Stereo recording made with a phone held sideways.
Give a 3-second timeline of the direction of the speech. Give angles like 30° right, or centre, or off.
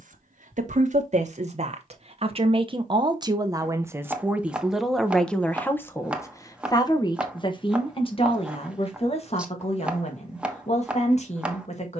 50° right, 10° right, 30° left, 50° left.